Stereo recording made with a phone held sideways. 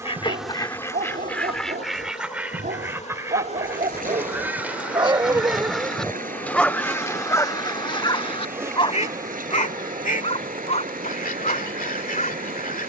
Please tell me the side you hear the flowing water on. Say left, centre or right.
right.